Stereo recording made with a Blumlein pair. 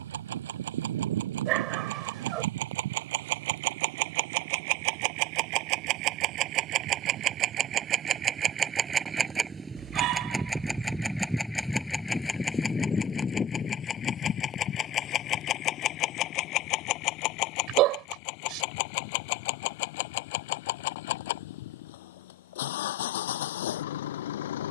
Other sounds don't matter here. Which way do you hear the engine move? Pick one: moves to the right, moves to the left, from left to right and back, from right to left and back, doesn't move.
moves to the left.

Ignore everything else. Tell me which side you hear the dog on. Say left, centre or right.
right.